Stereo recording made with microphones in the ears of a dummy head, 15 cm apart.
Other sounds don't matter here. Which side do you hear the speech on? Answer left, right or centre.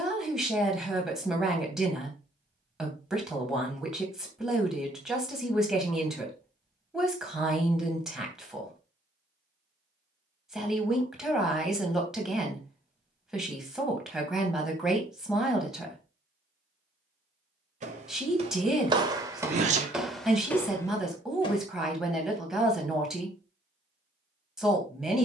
centre.